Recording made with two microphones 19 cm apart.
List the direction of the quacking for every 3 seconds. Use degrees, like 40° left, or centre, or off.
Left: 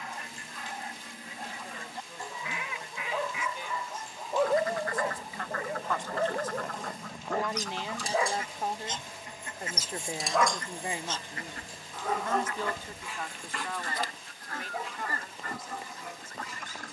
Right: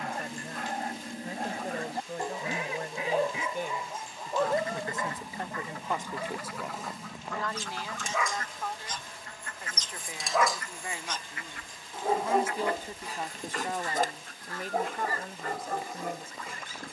40° right, 20° right, centre, 30° left, 50° left, 60° left.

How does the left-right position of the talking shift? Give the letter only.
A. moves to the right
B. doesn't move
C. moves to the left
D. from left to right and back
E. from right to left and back
E.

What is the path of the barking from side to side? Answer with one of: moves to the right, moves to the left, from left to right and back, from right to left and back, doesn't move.
from right to left and back.